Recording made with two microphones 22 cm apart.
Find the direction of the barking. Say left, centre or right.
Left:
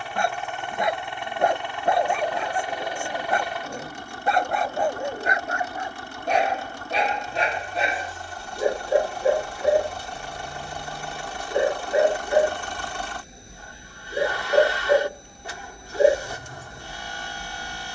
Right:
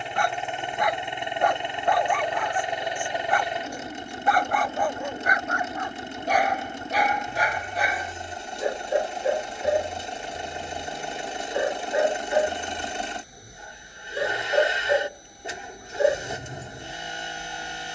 left.